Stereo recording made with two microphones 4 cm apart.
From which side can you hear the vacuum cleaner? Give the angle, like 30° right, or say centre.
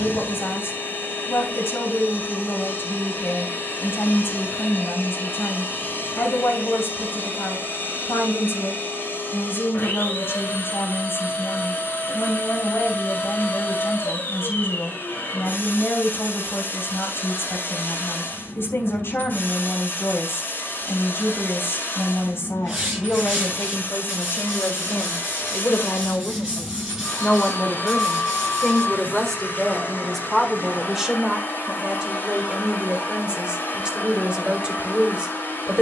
60° left.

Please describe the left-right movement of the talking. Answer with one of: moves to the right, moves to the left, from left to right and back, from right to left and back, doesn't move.
moves to the right.